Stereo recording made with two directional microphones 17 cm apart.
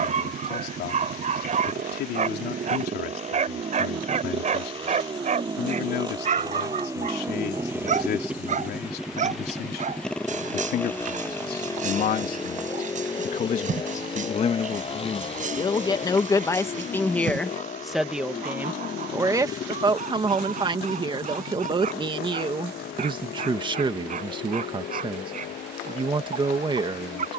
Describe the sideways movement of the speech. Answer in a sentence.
You can hear the speech go from the left side to the right.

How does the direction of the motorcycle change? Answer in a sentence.
In this clip you hear the motorcycle move from right to left.